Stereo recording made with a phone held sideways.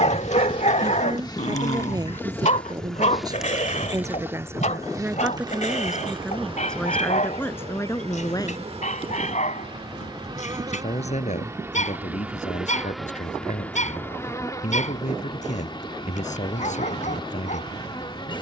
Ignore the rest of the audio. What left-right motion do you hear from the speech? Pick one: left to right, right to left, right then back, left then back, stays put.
right to left.